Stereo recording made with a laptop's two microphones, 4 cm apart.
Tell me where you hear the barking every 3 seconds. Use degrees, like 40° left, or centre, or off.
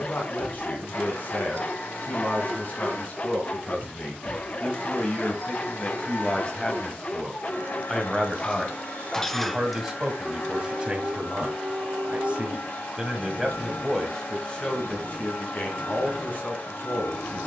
40° left, 40° left, 30° left, 20° right, 60° right, 70° right.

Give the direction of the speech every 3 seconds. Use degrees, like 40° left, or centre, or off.
40° left, 40° left, 10° left, 20° right, centre, 40° left.